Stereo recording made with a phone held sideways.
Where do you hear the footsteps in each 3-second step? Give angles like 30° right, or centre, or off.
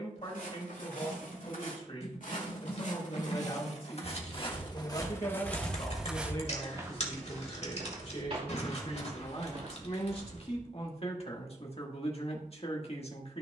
70° left, 30° left, 30° right, 50° right, off.